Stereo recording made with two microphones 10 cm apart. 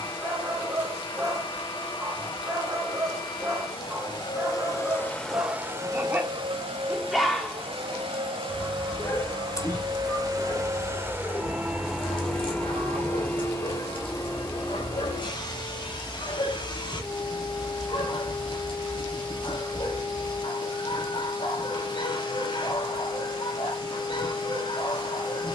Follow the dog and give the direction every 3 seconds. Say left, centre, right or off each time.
right, right, centre, left, left, left, left, left, left.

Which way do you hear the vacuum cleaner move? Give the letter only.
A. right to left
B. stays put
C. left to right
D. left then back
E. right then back
E.